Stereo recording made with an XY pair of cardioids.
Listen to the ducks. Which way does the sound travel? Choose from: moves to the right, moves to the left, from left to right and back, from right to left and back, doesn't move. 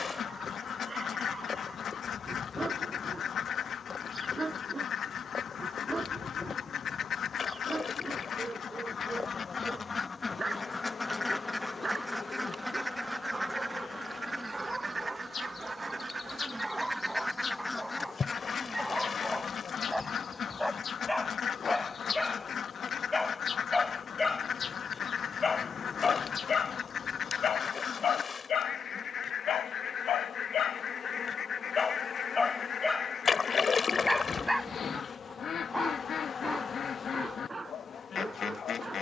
from left to right and back.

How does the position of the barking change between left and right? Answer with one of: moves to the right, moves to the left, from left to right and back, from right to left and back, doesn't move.
from right to left and back.